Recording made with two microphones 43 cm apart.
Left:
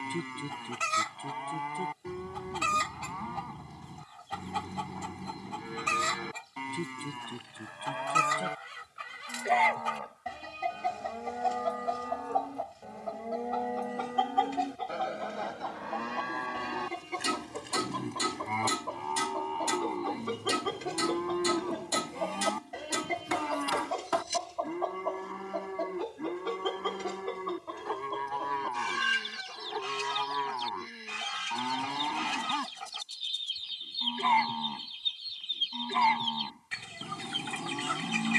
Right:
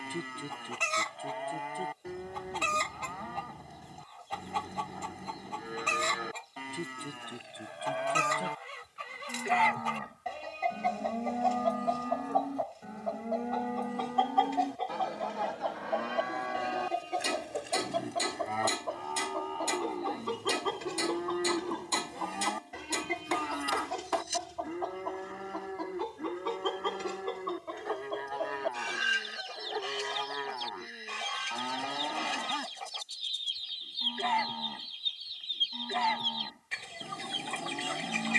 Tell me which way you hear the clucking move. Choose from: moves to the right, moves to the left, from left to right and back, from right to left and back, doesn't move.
from left to right and back.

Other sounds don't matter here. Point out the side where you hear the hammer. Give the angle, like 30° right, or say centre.
30° left.